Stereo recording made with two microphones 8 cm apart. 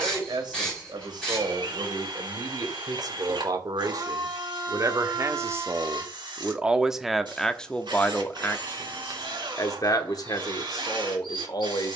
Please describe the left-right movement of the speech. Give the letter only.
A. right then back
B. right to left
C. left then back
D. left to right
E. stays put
B.